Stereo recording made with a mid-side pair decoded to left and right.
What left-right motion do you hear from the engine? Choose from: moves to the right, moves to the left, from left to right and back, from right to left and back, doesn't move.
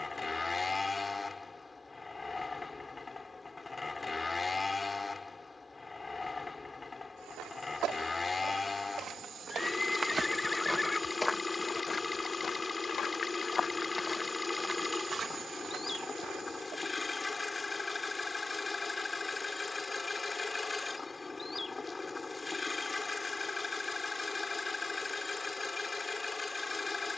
doesn't move.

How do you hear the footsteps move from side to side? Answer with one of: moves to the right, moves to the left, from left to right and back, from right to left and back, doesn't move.
from right to left and back.